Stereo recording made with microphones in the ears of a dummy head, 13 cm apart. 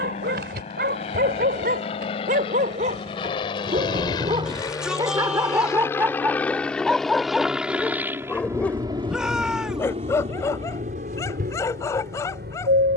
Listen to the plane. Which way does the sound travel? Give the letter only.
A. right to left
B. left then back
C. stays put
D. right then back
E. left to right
E.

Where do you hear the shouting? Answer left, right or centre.
centre.